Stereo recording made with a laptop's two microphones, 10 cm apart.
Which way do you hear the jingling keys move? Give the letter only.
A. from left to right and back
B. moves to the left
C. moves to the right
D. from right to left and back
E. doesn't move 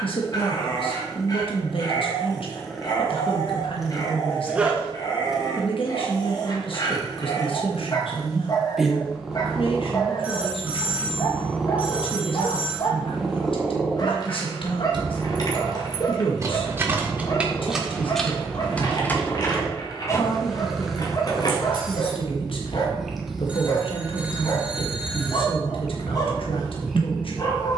B.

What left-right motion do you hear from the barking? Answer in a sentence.
You can hear the barking stay put.